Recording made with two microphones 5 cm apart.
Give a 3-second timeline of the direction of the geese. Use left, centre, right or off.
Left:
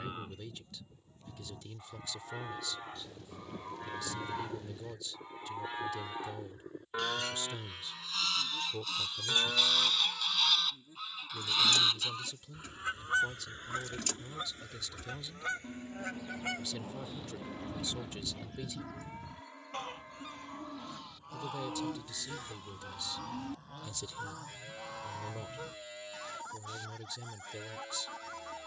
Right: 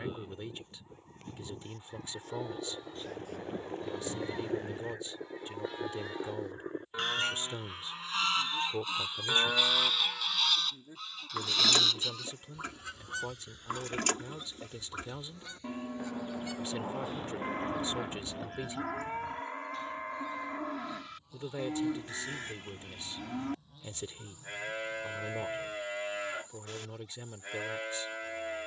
right, right, right, centre, left, left, left, left, left, left.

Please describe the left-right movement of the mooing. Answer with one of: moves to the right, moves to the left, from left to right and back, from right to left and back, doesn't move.
moves to the right.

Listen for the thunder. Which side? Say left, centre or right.
right.